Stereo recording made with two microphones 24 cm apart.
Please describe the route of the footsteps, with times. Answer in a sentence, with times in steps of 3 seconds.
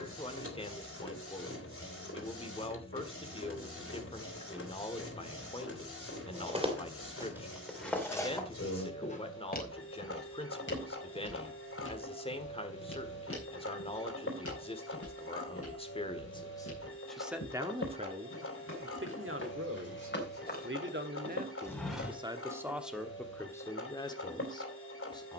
You can hear the footsteps not at all from 0 s, in the centre from 6 s, on the left from 9 s, in the centre from 21 s and not at all from 24 s.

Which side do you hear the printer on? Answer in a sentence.
You can hear the printer on the left.